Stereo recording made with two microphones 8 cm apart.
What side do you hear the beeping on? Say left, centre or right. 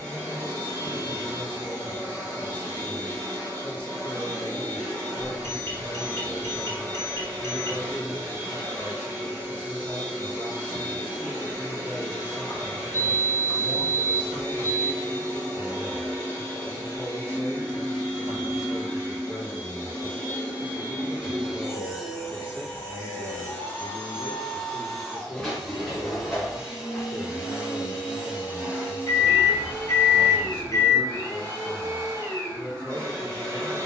left.